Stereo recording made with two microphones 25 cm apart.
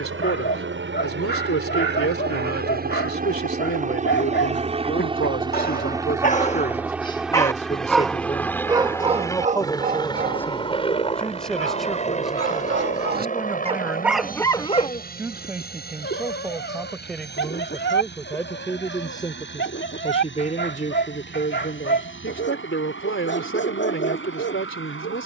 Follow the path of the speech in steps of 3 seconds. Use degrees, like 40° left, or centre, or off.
70° left, 60° left, 30° left, 10° left, 10° right, centre, 20° left, 50° left, 60° left.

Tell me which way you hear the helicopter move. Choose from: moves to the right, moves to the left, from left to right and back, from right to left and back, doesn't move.
moves to the left.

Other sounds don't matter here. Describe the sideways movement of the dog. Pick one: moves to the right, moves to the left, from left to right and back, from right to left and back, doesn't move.
from left to right and back.